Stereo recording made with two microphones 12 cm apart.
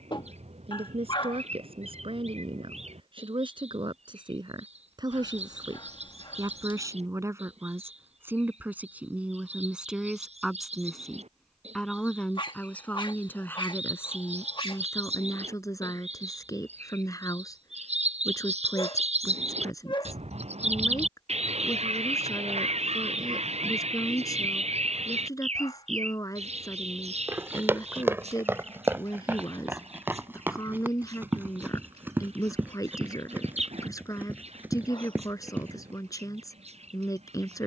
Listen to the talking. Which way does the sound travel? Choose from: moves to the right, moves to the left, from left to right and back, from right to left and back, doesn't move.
moves to the left.